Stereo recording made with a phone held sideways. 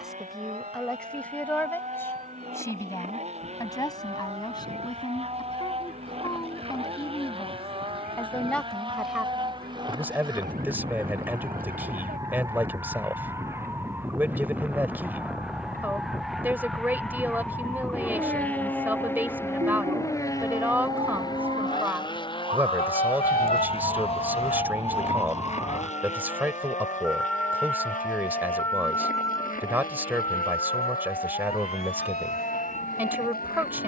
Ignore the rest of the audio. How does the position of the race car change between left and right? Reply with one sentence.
You can hear the race car move from right to left.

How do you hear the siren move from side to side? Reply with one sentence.
You can hear the siren go from the right side to the left.